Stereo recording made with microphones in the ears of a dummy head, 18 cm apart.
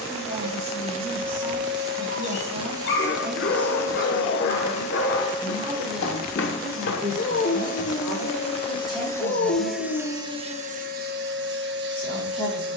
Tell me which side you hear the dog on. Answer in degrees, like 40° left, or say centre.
60° left.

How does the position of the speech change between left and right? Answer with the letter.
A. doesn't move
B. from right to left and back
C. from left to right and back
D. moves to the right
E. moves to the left
E.